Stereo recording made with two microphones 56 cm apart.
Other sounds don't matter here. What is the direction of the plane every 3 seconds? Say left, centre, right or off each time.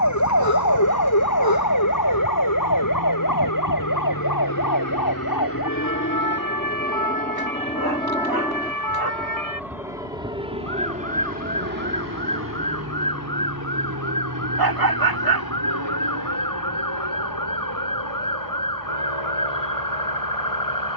left, left, centre, centre, right, right, right.